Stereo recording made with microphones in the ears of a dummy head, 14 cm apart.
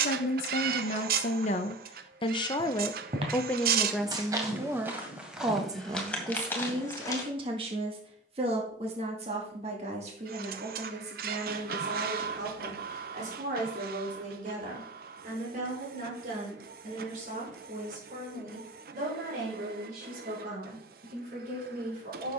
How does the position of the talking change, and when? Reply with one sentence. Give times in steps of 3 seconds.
You can hear the talking on the left from 0 s, in the centre from 3 s and on the right from 6 s.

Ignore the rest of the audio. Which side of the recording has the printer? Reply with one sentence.
You can hear the printer on the right.